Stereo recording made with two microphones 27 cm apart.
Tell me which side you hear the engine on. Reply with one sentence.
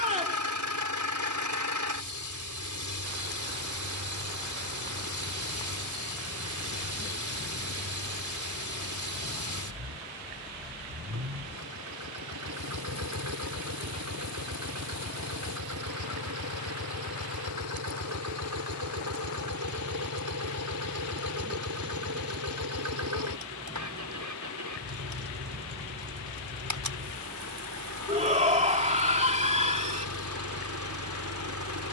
In this clip you hear the engine on the right.